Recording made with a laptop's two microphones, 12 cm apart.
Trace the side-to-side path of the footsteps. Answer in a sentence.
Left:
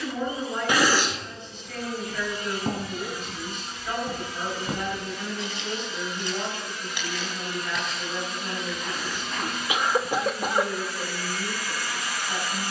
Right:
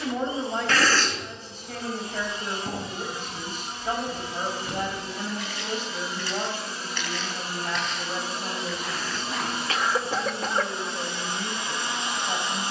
You can hear the footsteps travel towards the right.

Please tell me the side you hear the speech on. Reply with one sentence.
You can hear the speech on the right.